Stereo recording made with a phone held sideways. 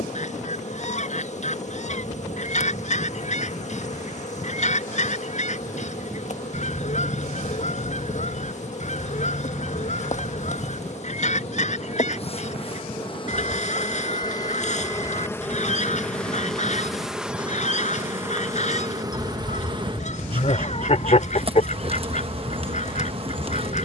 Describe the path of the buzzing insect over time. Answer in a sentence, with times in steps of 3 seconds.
You can hear the buzzing insect on the left from 0 s, in the centre from 15 s and on the right from 18 s.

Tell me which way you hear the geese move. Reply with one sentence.
You can hear the geese stay in one place.